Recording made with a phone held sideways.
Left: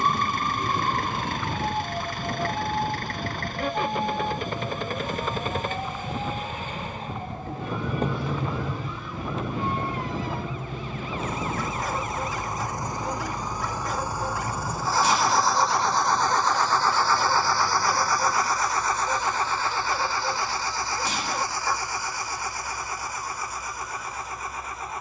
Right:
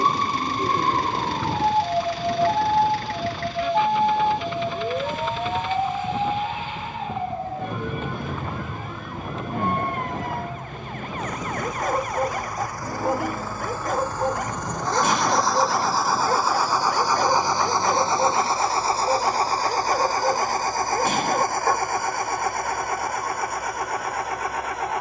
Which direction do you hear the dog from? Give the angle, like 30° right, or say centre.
50° right.